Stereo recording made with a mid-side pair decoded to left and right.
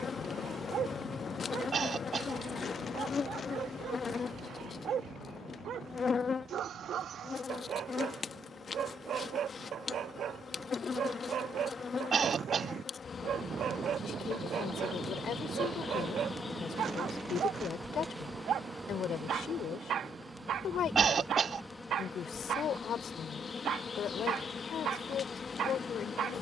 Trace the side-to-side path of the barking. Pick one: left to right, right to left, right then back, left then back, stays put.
stays put.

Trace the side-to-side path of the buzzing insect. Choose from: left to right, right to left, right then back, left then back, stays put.
right then back.